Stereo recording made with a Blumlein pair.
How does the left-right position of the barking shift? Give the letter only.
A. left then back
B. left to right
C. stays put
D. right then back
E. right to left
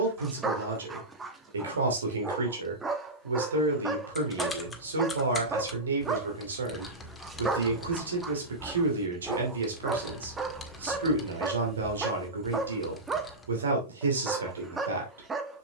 C.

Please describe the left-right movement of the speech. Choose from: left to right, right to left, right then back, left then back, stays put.
stays put.